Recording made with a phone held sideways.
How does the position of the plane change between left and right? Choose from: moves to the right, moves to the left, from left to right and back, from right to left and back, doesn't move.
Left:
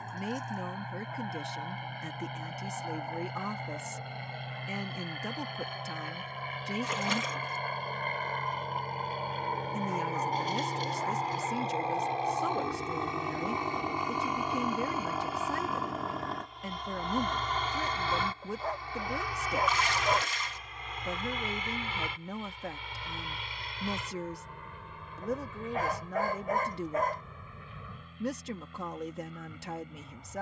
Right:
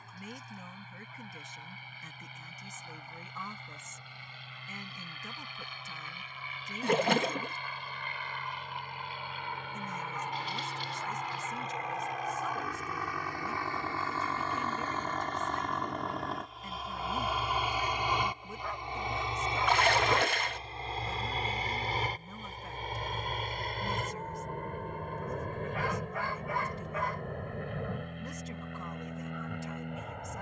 moves to the right.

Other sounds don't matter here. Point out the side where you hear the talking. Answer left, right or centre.
left.